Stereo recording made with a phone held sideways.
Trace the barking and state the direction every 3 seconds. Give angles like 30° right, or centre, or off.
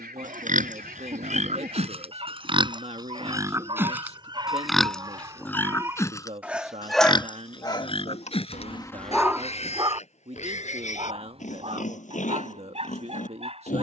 40° right, 30° right, 20° left, 30° right, 40° right.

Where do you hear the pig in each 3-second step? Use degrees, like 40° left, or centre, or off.
50° right, centre, 30° left, 50° left, 60° left.